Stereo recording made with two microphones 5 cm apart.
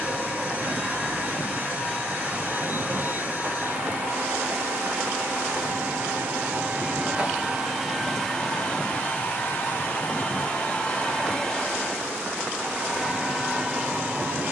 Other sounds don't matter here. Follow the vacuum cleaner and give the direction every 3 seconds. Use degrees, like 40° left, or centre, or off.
40° right, 40° right, 10° right, 20° left, 20° right.